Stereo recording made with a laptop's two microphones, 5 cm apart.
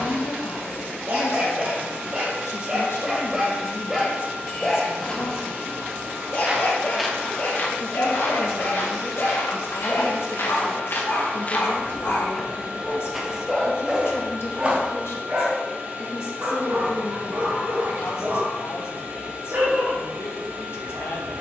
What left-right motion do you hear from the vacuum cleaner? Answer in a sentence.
In this clip you hear the vacuum cleaner stay put.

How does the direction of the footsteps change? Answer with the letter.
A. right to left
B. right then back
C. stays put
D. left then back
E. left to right
D.